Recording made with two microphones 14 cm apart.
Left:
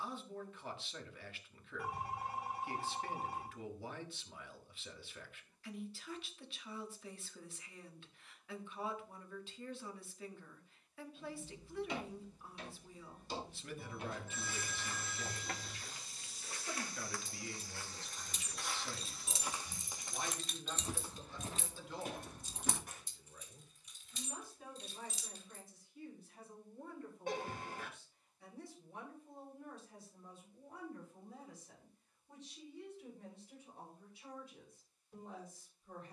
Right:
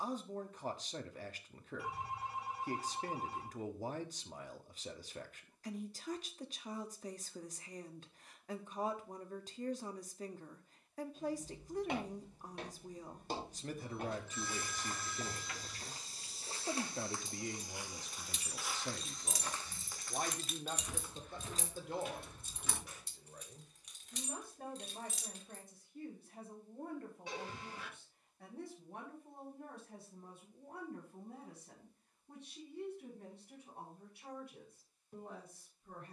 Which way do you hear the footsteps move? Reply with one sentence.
In this clip you hear the footsteps travel towards the left.